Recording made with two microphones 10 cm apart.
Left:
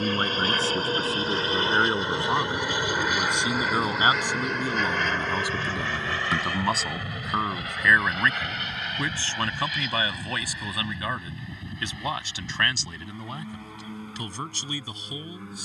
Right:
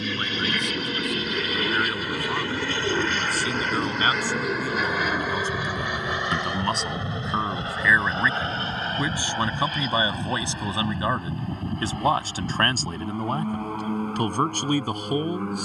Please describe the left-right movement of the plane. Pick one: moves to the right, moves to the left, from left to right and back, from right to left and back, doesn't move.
moves to the right.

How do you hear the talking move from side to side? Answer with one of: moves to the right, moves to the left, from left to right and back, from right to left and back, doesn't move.
moves to the right.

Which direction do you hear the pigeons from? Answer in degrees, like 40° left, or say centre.
30° right.